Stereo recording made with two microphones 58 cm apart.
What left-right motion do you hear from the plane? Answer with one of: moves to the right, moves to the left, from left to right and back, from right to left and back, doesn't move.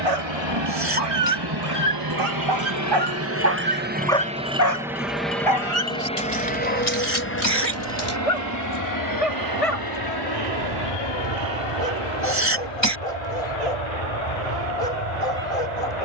moves to the left.